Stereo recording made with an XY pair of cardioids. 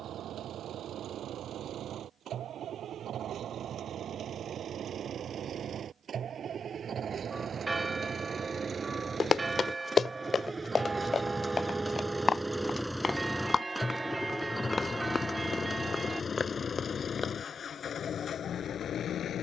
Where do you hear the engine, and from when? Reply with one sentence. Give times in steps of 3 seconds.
In this clip you hear the engine on the right from 0 s, in the centre from 12 s and on the left from 15 s.